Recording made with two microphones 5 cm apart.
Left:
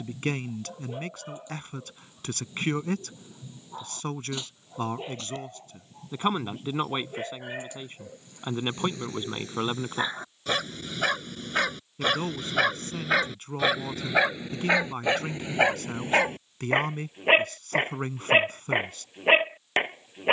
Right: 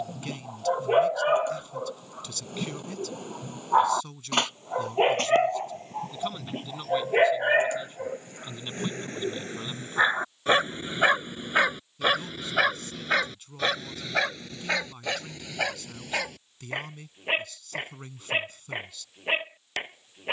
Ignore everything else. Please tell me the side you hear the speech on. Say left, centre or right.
left.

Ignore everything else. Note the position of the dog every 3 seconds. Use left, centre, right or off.
right, right, right, right, centre, left, left.